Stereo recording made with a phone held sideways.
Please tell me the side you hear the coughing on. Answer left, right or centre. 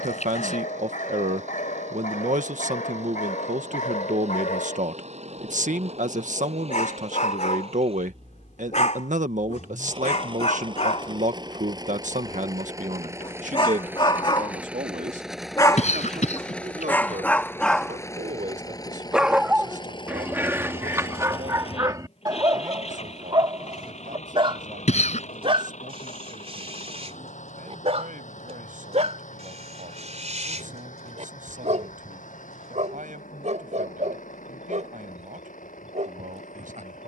left.